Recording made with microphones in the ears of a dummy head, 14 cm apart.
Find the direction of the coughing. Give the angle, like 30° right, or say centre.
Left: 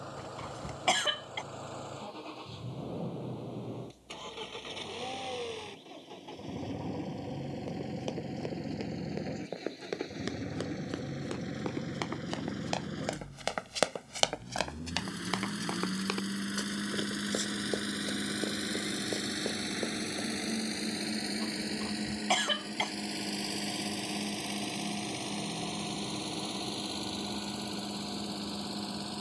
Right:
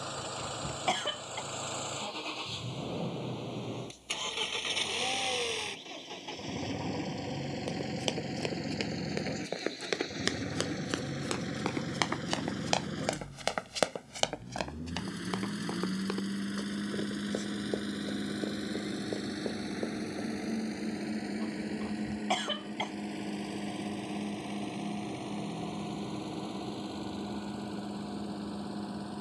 30° left.